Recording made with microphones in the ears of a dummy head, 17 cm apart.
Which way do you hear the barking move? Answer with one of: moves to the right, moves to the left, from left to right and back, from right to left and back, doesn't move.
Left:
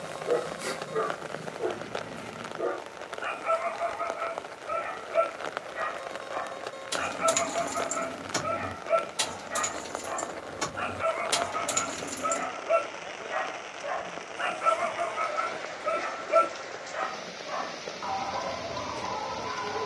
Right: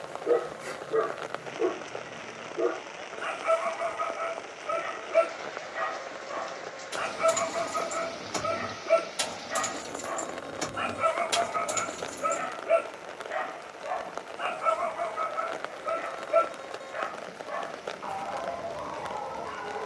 moves to the left.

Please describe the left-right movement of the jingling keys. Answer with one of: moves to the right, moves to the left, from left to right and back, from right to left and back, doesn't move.
from left to right and back.